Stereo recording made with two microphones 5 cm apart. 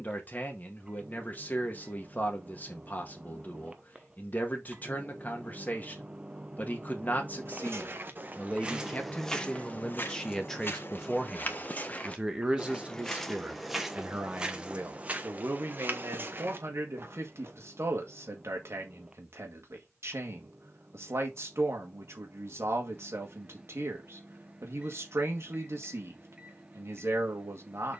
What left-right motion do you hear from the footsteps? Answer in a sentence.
In this clip you hear the footsteps go left and come back.